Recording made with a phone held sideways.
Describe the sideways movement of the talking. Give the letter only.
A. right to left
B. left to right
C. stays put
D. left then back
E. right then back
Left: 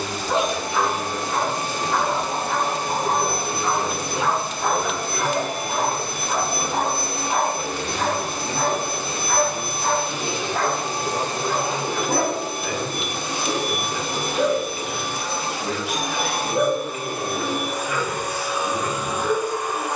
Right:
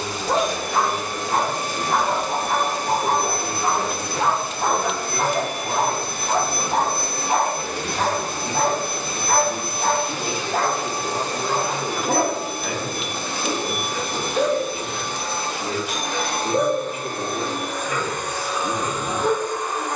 D.